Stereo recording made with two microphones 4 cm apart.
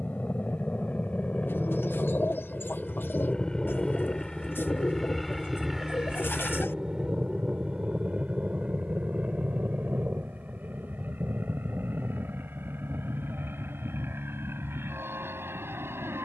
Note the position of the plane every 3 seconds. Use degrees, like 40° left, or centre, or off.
30° left, 10° left, 20° right, 40° right, 60° right, 60° right.